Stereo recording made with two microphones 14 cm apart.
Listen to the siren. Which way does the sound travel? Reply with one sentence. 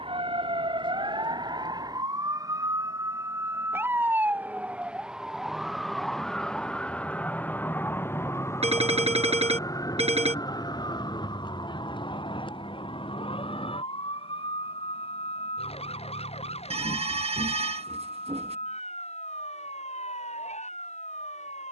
In this clip you hear the siren go from the right side to the left.